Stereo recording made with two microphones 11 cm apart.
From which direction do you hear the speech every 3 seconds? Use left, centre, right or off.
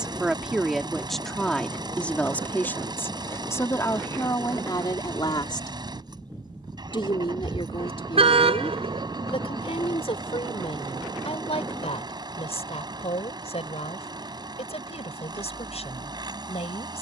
centre, left, left, left, left, left.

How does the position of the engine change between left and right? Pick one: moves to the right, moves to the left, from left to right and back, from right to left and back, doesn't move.
doesn't move.